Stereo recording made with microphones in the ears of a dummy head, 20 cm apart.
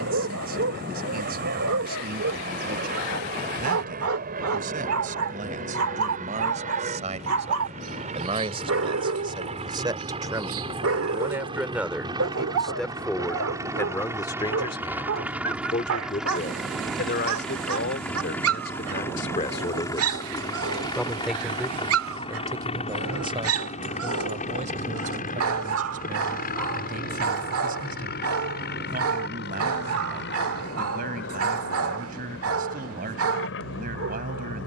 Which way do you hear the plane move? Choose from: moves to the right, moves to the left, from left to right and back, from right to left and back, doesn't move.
moves to the left.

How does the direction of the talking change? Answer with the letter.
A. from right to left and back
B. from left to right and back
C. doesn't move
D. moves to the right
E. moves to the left
A.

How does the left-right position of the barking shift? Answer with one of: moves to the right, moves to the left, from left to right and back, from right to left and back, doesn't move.
doesn't move.